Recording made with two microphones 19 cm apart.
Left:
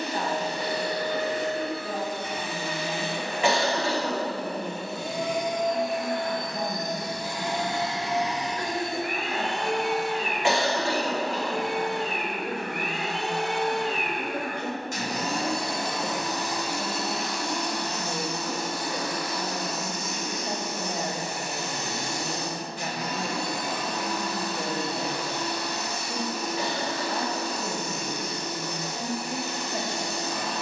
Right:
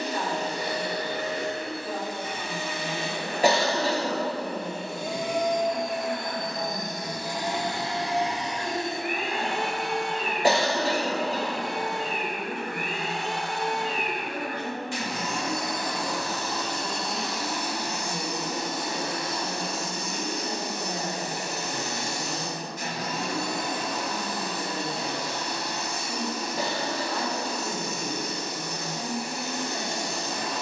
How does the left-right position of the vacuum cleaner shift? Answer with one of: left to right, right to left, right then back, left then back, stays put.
left then back.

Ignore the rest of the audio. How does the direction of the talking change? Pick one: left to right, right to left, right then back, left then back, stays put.
stays put.